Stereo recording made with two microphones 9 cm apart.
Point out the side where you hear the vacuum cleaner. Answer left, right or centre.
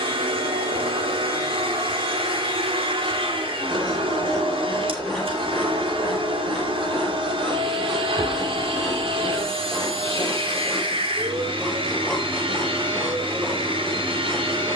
right.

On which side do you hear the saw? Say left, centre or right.
centre.